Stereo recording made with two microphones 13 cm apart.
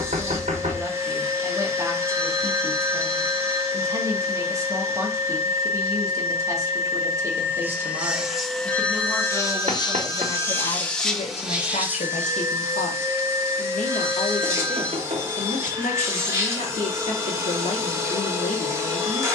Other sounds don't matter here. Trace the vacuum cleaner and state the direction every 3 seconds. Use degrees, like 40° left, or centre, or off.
20° right, 20° right, 10° right, 10° left, 20° right, 20° right, 20° right.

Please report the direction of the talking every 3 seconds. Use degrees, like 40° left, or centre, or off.
20° right, 20° right, 20° right, 30° left, 70° left, 70° left, 70° left.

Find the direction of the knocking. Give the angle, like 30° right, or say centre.
60° right.